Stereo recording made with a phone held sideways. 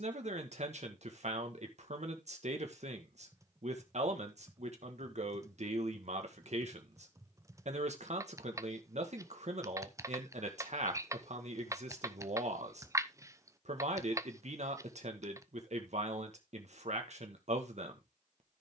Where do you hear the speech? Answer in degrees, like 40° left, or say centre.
60° right.